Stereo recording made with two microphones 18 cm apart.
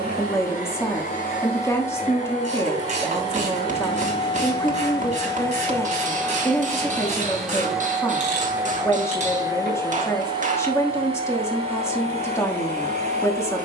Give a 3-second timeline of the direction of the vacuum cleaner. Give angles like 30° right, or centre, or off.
50° left, 30° left, centre, 30° right, 40° right.